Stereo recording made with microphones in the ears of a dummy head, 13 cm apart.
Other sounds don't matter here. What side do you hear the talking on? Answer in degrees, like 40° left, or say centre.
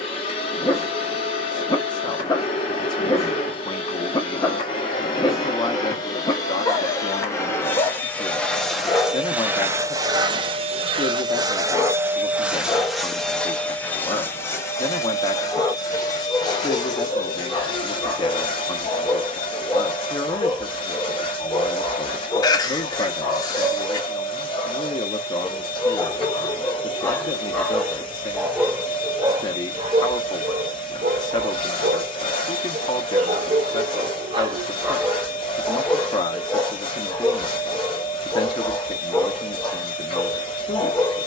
30° left.